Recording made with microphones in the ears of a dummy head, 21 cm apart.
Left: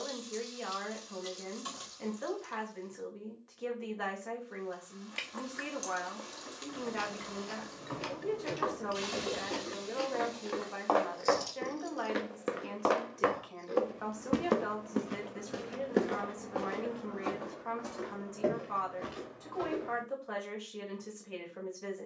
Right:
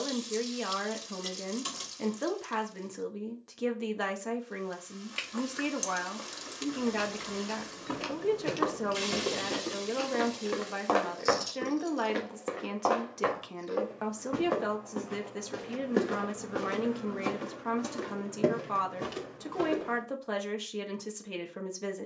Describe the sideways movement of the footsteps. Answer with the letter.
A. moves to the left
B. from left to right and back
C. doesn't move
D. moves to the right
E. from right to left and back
E.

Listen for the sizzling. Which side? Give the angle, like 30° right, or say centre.
40° right.